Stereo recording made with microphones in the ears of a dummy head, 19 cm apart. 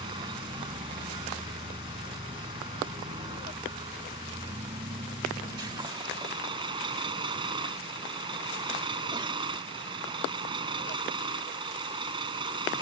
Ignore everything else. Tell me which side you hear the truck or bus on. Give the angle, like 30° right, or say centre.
20° right.